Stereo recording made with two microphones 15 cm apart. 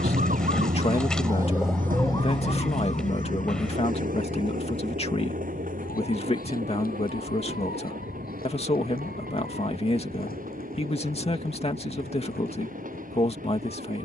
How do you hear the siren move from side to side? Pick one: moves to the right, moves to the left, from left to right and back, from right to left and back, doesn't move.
moves to the left.